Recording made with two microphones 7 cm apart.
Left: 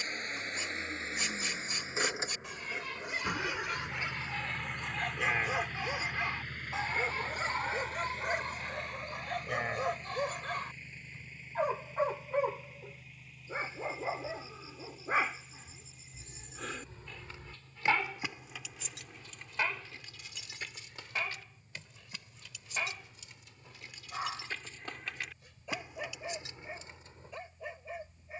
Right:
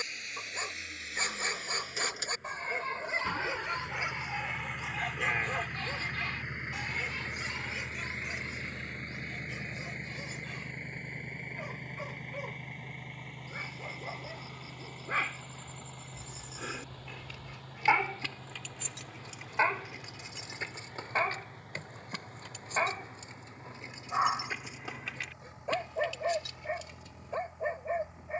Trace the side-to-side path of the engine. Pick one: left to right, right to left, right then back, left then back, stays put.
left to right.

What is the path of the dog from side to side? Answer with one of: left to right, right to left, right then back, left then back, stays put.
left then back.